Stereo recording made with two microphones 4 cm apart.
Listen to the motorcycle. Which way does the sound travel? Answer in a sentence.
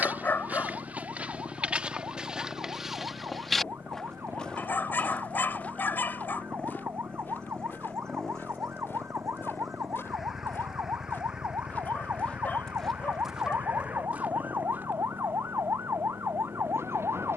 You can hear the motorcycle move to the right.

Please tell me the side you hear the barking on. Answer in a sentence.
You can hear the barking on the left.